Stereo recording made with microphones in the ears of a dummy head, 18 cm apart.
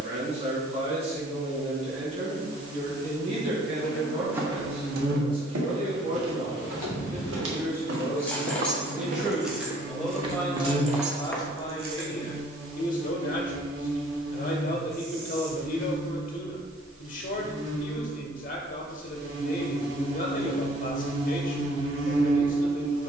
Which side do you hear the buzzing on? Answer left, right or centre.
right.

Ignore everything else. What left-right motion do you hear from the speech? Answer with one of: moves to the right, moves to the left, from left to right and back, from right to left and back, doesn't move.
moves to the left.